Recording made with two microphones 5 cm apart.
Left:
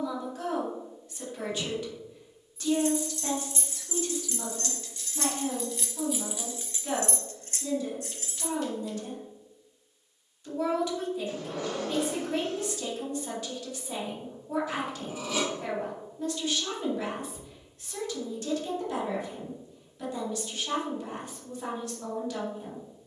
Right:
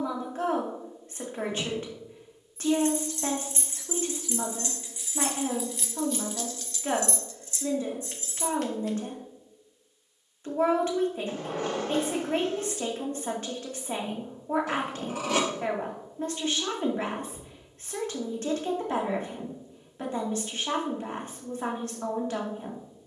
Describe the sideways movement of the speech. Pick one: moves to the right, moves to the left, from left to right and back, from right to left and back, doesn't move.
doesn't move.